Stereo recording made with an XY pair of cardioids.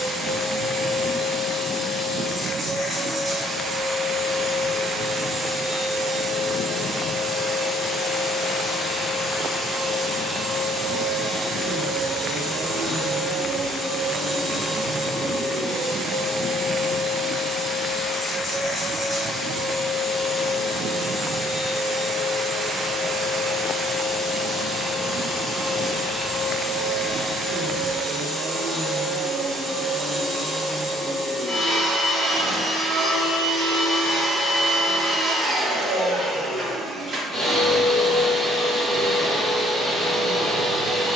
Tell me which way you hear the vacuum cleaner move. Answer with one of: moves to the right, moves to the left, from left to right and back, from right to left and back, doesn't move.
doesn't move.